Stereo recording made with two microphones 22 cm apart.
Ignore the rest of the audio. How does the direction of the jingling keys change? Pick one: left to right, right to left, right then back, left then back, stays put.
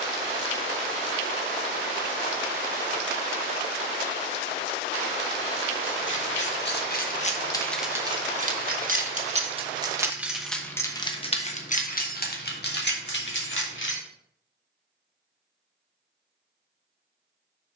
right then back.